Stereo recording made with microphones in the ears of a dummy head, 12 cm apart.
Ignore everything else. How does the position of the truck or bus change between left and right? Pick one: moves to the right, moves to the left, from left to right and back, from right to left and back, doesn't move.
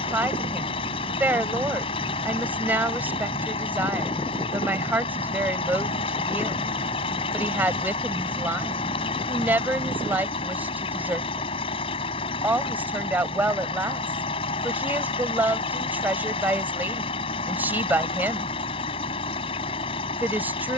doesn't move.